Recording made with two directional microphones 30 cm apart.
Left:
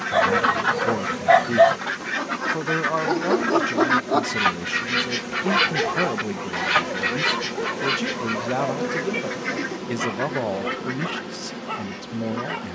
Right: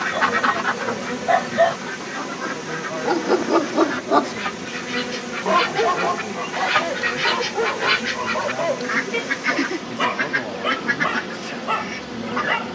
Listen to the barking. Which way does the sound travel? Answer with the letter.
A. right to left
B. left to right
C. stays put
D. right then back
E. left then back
B.